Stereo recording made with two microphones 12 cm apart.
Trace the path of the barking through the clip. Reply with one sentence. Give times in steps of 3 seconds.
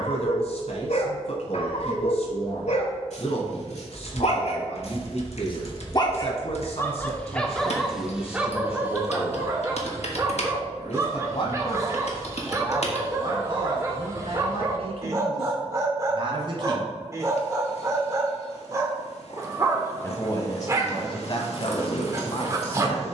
You can hear the barking on the left from 0 s, in the centre from 6 s and on the right from 9 s.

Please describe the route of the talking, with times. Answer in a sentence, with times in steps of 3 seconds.
In this clip you hear the talking on the left from 0 s, on the right from 12 s and on the left from 18 s.